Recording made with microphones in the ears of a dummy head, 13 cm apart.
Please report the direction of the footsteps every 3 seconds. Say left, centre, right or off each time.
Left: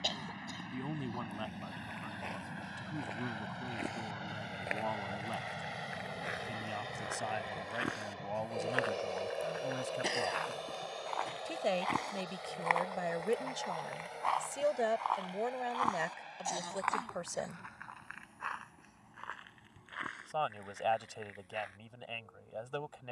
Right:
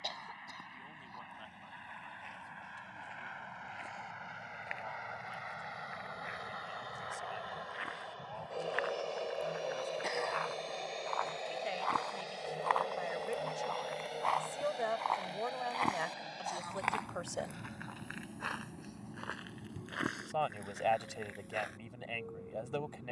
left, left, left, left, centre, right, right, right.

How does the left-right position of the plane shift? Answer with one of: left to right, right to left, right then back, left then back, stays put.
left to right.